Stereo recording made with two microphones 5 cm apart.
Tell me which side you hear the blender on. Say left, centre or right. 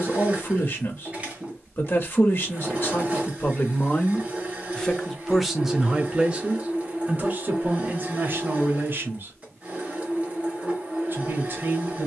right.